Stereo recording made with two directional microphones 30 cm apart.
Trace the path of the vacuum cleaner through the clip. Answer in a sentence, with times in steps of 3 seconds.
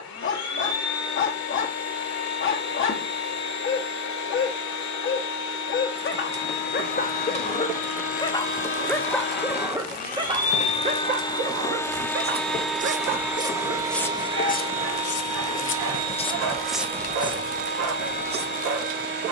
You can hear the vacuum cleaner on the left from 0 s, in the centre from 12 s and on the right from 15 s.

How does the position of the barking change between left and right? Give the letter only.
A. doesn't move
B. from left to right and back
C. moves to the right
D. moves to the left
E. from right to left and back
C.